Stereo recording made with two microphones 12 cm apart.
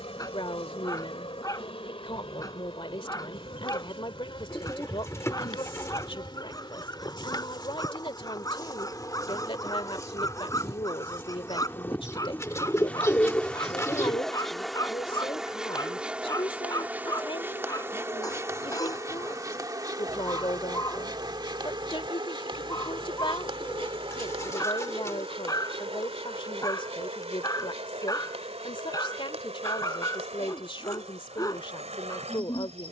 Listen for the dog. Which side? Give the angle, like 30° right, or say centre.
30° left.